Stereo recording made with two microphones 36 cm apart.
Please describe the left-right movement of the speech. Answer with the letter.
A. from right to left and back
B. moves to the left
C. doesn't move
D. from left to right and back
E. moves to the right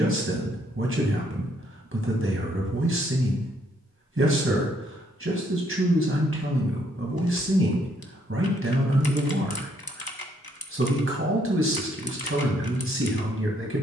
C.